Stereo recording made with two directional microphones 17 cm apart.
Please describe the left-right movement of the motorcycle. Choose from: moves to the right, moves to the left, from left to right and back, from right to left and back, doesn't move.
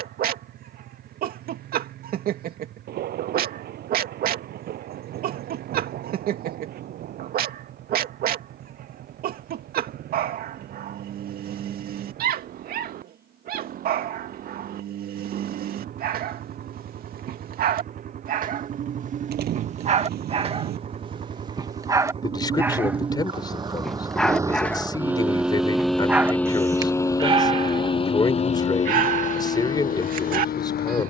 moves to the left.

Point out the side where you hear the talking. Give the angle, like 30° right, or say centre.
20° left.